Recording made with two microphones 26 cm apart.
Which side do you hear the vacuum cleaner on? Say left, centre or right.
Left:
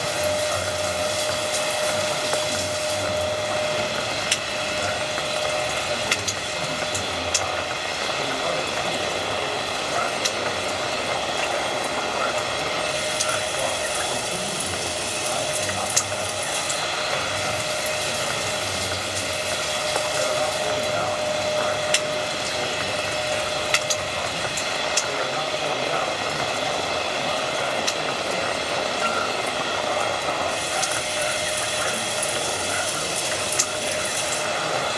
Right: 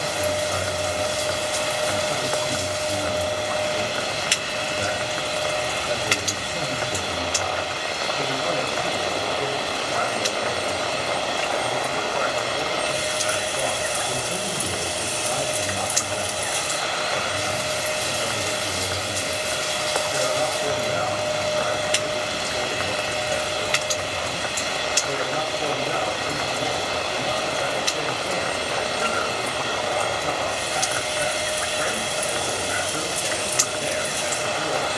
centre.